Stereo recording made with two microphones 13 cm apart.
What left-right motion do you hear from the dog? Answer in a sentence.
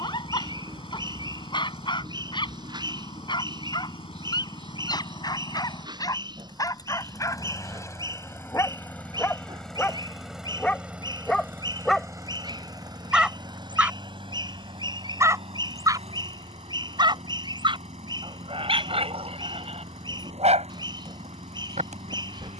In this clip you hear the dog move from left to right.